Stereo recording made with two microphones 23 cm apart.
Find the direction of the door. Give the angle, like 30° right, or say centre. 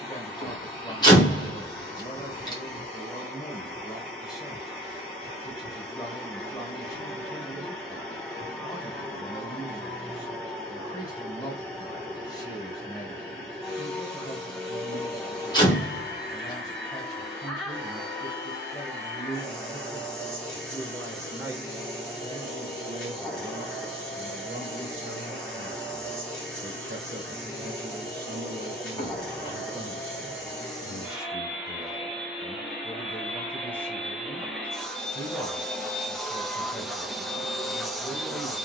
20° left.